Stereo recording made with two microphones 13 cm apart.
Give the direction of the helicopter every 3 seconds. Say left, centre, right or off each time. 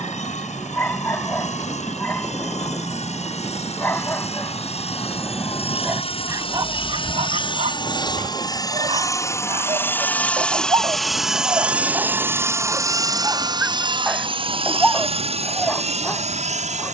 left, left, left, centre, right, right.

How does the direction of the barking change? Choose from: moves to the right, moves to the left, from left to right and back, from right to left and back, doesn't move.
from left to right and back.